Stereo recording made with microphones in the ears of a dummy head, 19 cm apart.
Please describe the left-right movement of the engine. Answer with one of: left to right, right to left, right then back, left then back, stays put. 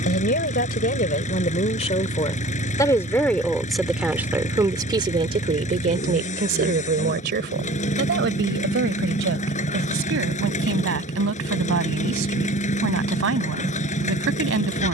stays put.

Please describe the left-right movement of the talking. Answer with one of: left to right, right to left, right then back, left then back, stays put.
left to right.